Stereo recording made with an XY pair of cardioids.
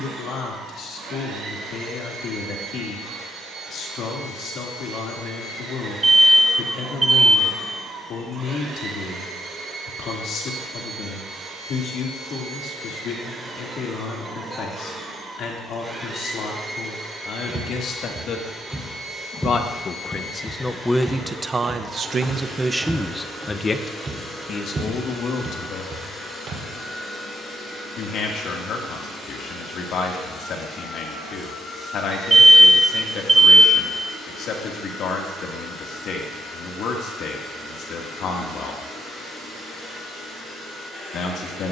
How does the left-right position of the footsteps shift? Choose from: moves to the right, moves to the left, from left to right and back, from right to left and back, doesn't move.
from right to left and back.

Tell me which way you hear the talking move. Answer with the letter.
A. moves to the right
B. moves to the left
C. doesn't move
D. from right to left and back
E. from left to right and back
E.